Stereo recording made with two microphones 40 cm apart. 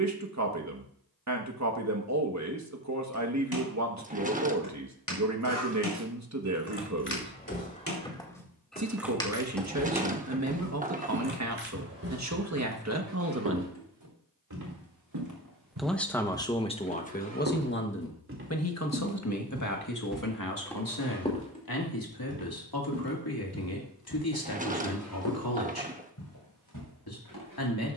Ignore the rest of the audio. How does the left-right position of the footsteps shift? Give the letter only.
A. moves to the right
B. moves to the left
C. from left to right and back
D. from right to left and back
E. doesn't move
C.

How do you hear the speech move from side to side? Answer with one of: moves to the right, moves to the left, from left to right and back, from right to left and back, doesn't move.
moves to the left.